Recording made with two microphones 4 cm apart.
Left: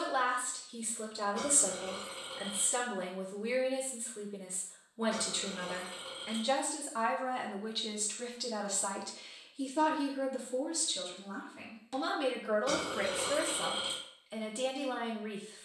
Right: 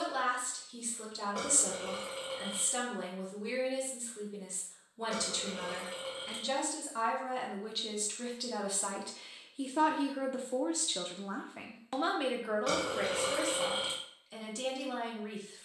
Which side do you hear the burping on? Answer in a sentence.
You can hear the burping on the right.